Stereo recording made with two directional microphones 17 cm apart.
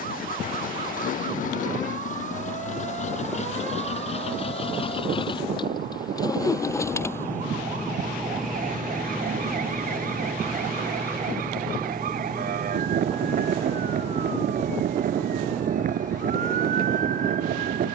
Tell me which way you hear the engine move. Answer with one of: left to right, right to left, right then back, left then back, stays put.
left to right.